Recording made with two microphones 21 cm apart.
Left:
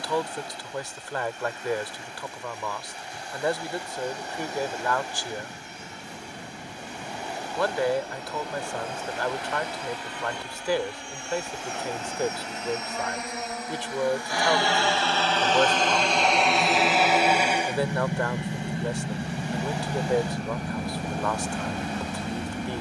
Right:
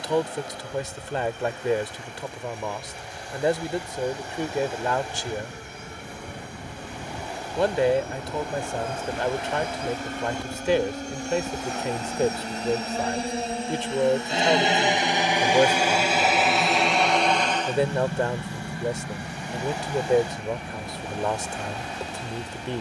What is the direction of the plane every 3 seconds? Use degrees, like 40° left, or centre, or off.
70° right, 60° right, 60° right, 50° right, 30° right, centre, 30° left, 50° left.